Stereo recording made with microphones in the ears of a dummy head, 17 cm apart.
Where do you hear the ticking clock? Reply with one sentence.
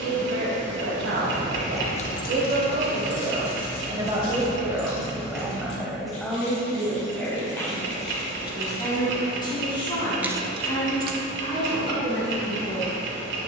You can hear the ticking clock on the right.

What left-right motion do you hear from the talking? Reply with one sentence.
In this clip you hear the talking move to the left.